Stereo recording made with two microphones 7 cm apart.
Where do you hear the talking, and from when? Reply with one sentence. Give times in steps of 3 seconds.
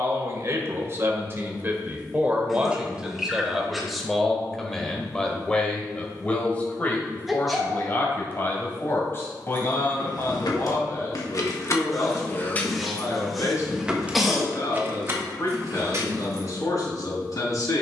You can hear the talking on the right from 0 s, in the centre from 3 s and on the left from 6 s.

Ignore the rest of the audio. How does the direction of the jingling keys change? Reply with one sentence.
In this clip you hear the jingling keys travel towards the right.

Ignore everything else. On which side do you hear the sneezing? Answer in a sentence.
You can hear the sneezing in the centre.